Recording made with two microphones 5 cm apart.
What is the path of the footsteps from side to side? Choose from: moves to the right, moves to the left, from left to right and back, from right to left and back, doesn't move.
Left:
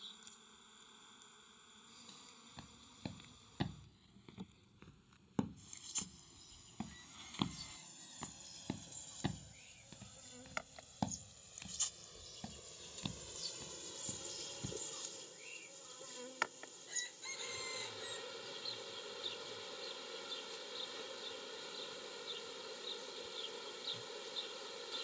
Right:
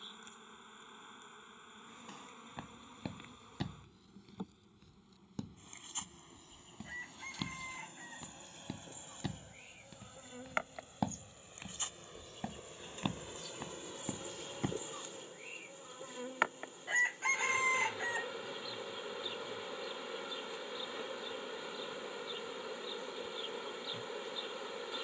from right to left and back.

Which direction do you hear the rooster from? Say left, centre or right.
right.